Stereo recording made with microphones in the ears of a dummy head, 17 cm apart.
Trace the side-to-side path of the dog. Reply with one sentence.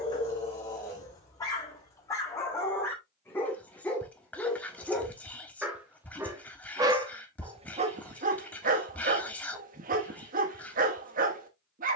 You can hear the dog move from left to right.